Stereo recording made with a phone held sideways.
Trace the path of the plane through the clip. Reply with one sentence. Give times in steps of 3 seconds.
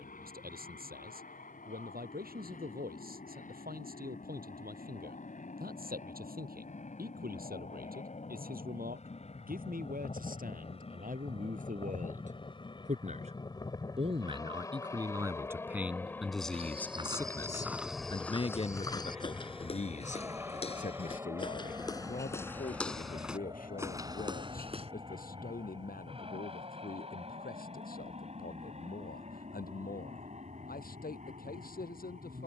You can hear the plane on the left from 0 s, in the centre from 15 s and on the right from 21 s.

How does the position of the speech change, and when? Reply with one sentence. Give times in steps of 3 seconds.
In this clip you hear the speech on the right from 0 s, in the centre from 15 s and on the left from 18 s.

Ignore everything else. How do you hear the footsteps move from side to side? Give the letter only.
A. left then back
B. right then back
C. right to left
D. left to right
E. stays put
A.